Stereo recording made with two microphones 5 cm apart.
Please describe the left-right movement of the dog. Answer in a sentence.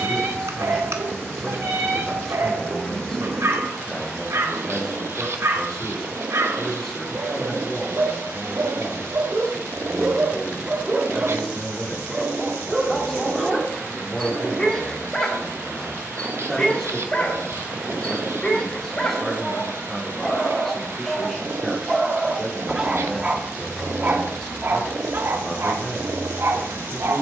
In this clip you hear the dog go left and come back.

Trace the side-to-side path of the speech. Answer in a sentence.
You can hear the speech stay put.